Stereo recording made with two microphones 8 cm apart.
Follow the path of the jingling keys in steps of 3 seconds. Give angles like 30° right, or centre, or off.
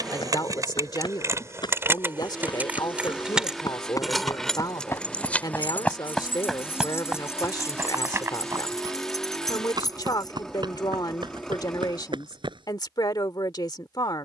30° right, 10° left, 40° left, 50° left, off.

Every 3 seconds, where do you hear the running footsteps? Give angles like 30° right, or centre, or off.
60° left, 40° left, 20° right, 60° right, 70° right.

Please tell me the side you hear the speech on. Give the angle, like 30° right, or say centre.
50° left.